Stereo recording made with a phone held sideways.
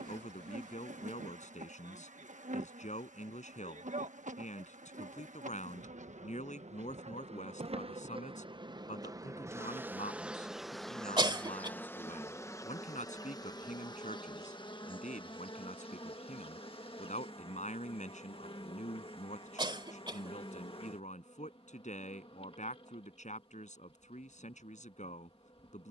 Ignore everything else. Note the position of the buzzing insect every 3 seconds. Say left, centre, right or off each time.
right, right, right, centre, left, left, left, left, left.